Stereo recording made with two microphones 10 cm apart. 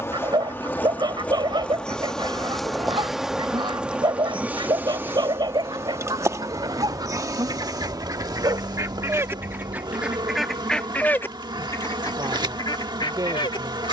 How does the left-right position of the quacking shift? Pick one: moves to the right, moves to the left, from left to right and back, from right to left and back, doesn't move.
moves to the left.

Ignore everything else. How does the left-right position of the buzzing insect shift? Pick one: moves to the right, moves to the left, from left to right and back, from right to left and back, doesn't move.
moves to the right.